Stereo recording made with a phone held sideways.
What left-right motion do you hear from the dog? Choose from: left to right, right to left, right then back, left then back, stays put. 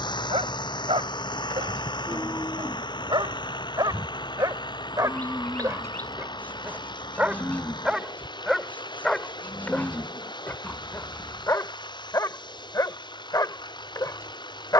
right to left.